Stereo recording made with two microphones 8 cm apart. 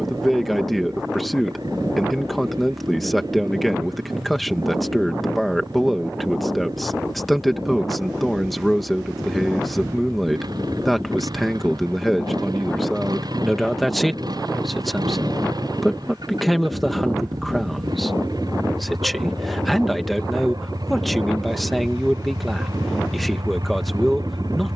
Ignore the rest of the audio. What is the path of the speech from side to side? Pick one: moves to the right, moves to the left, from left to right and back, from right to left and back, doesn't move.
doesn't move.